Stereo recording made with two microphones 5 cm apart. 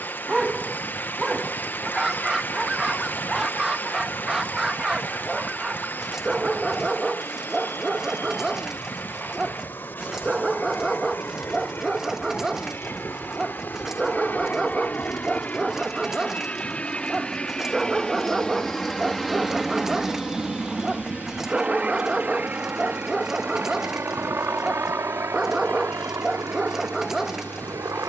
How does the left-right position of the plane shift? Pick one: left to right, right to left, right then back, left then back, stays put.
left to right.